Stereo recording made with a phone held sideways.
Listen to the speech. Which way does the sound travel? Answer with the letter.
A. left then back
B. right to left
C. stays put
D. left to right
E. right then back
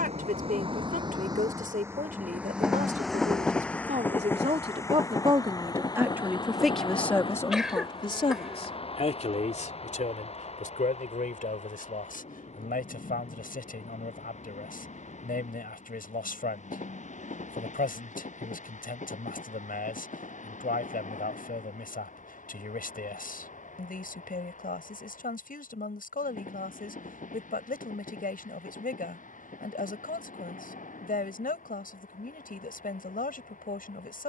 B.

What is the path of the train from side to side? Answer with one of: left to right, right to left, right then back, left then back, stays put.
right to left.